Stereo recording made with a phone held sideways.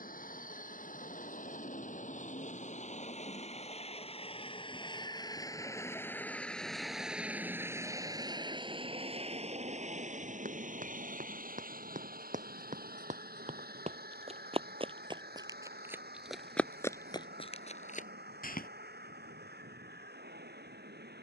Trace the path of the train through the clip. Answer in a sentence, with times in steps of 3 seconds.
You can hear the train on the left from 0 s, in the centre from 6 s and on the right from 9 s.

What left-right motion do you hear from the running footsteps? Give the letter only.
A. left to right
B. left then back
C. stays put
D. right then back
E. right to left
E.